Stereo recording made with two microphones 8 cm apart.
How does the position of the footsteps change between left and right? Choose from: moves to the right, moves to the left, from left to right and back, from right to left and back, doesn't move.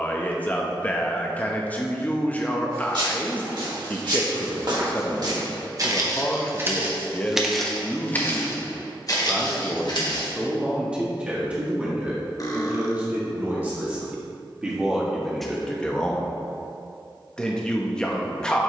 moves to the left.